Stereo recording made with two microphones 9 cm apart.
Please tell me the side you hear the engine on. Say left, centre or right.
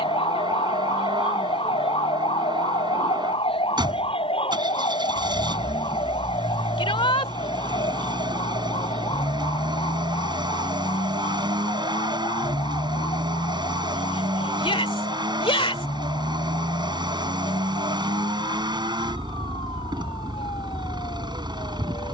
right.